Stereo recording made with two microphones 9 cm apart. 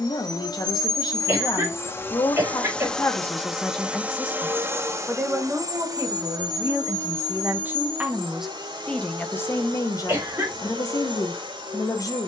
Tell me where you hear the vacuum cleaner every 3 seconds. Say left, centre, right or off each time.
left, right, right, right.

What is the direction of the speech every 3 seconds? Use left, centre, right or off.
left, centre, right, left.